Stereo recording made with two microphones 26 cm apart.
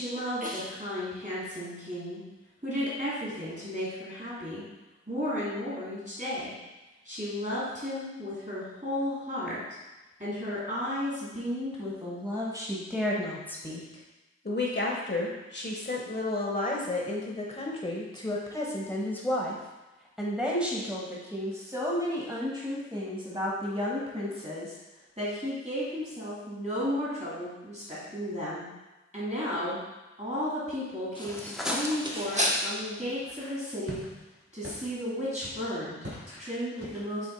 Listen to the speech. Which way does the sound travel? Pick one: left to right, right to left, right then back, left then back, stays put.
left then back.